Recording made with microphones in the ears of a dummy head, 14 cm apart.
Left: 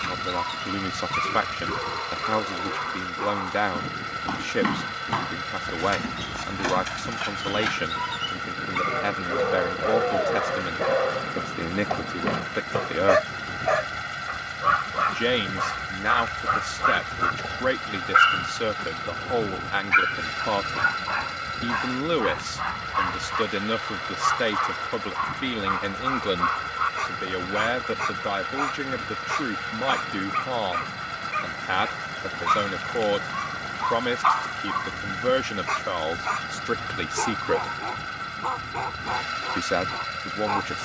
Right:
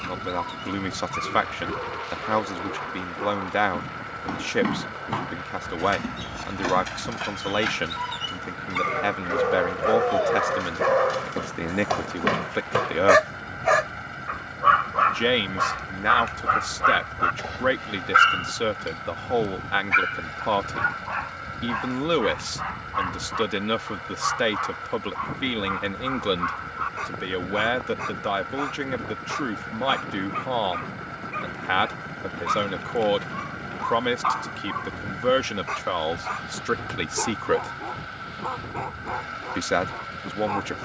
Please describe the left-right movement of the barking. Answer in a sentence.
In this clip you hear the barking move from left to right and back again.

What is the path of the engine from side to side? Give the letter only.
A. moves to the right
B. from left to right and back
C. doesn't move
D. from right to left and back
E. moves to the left
C.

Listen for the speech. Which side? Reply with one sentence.
You can hear the speech in the centre.